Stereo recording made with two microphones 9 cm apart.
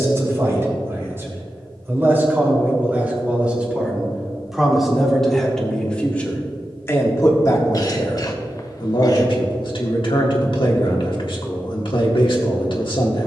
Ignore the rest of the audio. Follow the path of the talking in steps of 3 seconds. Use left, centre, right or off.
right, centre, left, left, left.